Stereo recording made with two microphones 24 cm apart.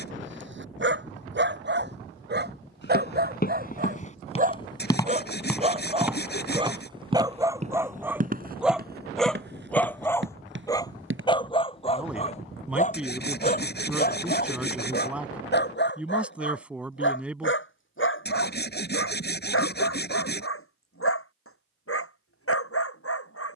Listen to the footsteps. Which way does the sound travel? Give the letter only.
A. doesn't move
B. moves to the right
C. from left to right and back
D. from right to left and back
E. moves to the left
B.